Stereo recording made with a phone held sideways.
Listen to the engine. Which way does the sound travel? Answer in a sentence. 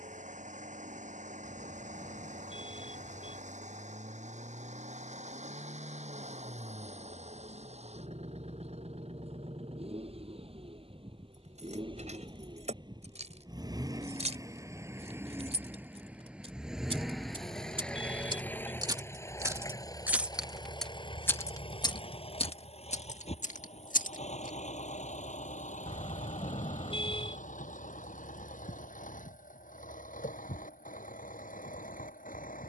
In this clip you hear the engine move from right to left.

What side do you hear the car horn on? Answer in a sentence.
In this clip you hear the car horn on the left.